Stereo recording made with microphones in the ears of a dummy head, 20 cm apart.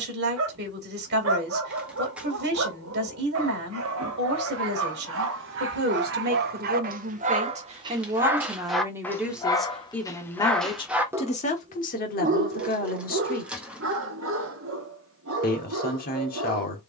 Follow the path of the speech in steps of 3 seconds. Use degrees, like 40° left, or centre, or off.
50° right, 50° right, 30° right, 20° left, 40° left, 40° left.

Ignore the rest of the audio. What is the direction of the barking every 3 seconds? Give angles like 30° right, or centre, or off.
70° right, 60° right, 30° right, 10° left, 50° right, 60° right.